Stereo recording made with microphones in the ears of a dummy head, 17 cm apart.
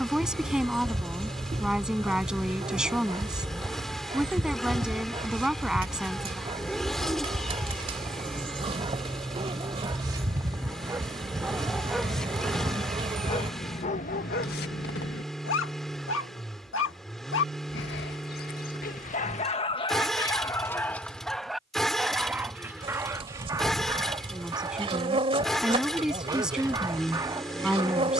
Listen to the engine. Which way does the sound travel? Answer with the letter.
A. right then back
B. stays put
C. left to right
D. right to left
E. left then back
B.